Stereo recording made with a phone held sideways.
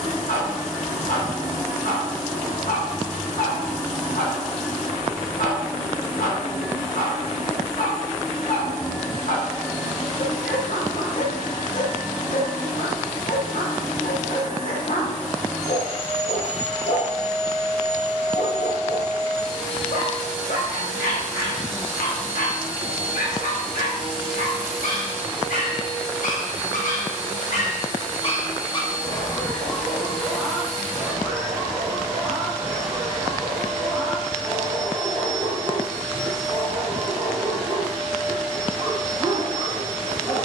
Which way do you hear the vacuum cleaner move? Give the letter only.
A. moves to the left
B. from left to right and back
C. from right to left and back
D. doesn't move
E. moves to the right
D.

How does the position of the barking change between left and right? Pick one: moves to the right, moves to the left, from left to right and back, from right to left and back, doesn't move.
moves to the right.